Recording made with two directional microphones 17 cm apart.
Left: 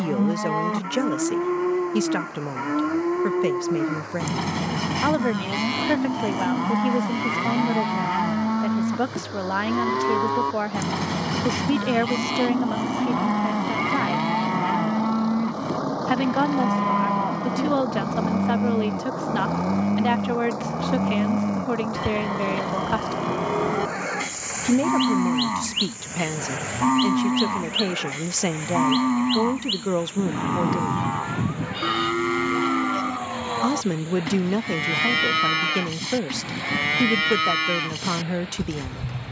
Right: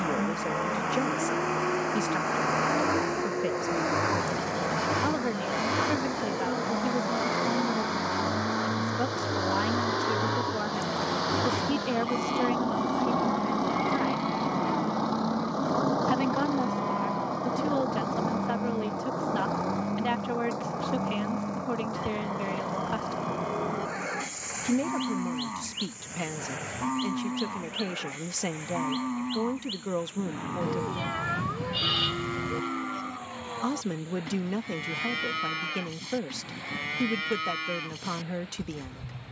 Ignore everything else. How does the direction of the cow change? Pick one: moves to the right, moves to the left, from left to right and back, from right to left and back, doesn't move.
doesn't move.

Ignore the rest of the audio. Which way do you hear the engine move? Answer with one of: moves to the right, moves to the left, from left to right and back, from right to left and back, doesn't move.
moves to the left.